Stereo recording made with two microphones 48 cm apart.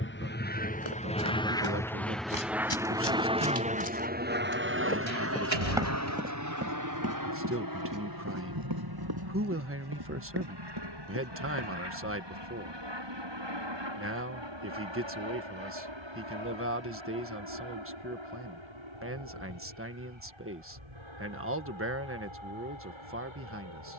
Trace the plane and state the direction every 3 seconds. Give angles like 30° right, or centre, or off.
10° left, 20° right, 40° right, 50° right, 60° right, 60° right, 60° right, 60° right.